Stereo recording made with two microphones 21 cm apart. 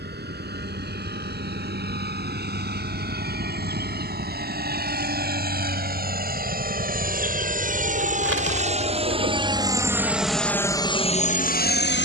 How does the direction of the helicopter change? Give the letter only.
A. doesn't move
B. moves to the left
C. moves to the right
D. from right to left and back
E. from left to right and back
B.